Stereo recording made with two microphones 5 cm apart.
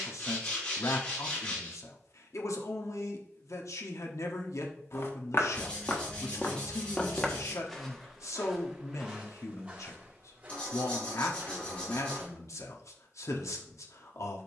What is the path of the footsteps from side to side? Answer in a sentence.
In this clip you hear the footsteps move from left to right.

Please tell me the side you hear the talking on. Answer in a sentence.
You can hear the talking on the left.